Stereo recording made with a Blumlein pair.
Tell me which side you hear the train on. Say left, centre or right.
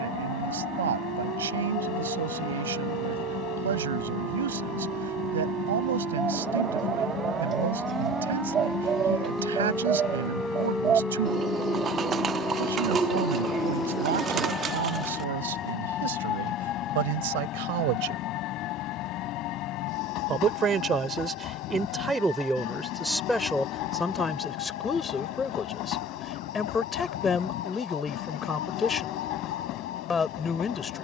left.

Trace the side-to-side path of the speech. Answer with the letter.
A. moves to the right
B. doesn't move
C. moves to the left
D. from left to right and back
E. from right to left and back
C.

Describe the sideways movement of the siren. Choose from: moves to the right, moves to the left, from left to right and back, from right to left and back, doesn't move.
moves to the left.